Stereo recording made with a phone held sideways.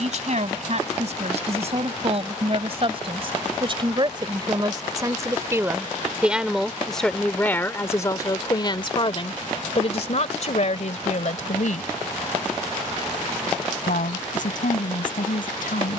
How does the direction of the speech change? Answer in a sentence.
You can hear the speech go from the right side to the left.